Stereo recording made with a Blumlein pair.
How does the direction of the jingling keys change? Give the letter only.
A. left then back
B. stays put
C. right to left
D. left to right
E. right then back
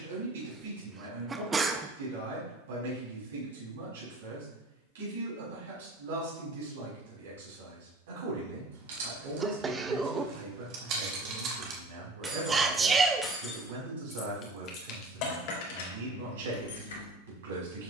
C.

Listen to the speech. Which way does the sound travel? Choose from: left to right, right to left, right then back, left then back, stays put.
stays put.